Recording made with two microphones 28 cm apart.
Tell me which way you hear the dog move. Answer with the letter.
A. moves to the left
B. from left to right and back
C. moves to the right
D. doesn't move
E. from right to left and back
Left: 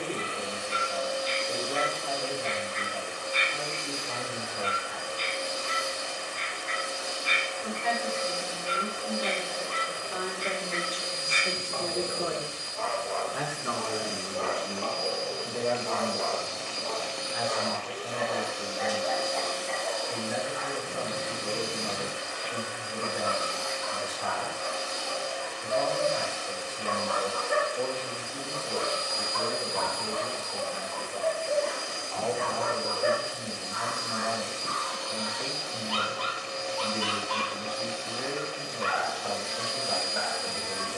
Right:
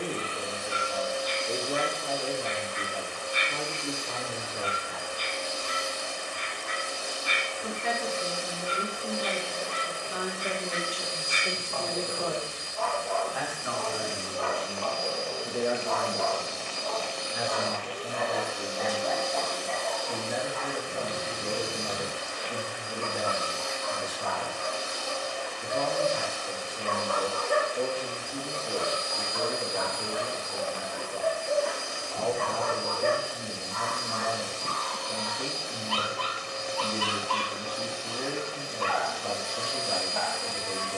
B.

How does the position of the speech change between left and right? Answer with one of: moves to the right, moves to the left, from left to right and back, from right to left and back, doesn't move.
from right to left and back.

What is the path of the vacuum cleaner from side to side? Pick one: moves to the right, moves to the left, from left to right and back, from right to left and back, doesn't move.
doesn't move.